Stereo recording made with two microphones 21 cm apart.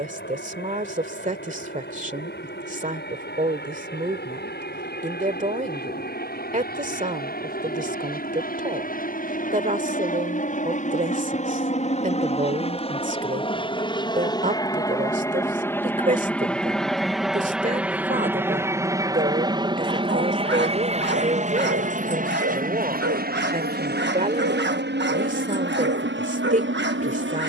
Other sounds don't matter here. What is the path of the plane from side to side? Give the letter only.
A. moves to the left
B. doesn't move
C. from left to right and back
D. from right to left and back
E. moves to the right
E.